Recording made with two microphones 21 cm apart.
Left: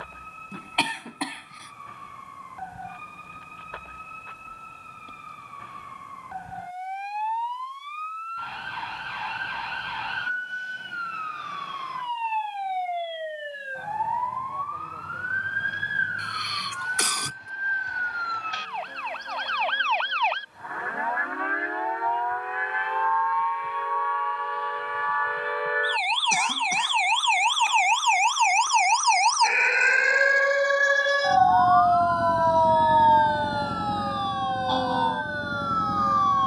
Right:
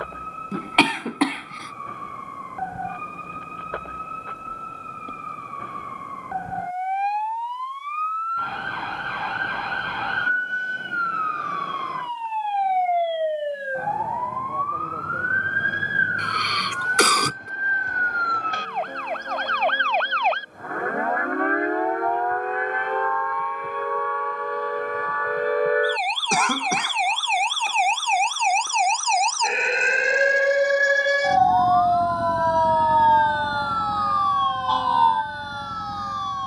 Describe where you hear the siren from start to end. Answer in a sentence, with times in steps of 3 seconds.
In this clip you hear the siren on the right from 0 s, in the centre from 30 s and on the left from 33 s.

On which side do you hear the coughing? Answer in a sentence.
You can hear the coughing on the right.